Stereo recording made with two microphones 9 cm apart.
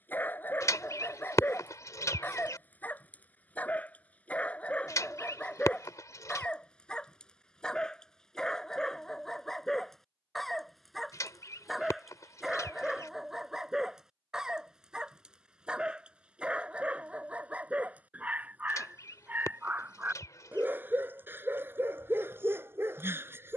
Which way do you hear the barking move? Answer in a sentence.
You can hear the barking move from left to right.